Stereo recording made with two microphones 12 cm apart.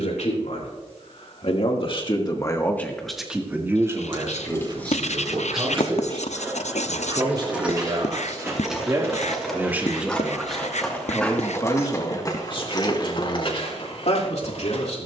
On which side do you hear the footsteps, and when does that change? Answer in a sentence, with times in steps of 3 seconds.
You can hear the footsteps not at all from 0 s, on the right from 6 s, in the centre from 9 s and on the left from 12 s.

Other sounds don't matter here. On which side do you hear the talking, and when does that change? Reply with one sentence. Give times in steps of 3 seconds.
You can hear the talking on the left from 0 s, on the right from 3 s, in the centre from 9 s and on the left from 12 s.